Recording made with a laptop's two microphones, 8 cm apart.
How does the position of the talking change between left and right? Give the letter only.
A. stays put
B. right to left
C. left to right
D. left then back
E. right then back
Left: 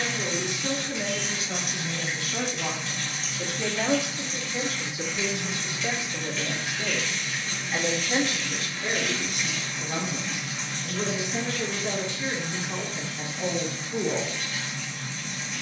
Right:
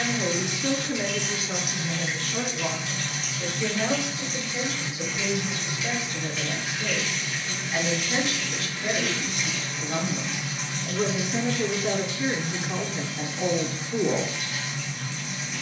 D.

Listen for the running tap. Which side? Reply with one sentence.
In this clip you hear the running tap in the centre.